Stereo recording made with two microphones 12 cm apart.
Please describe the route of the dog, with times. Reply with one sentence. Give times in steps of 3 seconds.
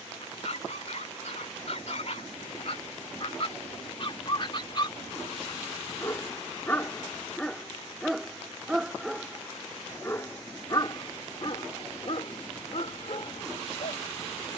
You can hear the dog on the left from 0 s, in the centre from 6 s and on the left from 9 s.